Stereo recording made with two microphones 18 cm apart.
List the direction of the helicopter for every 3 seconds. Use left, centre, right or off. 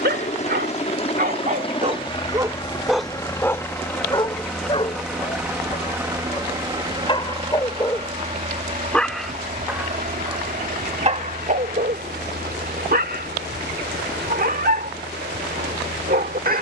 left, centre, right, right, right, right.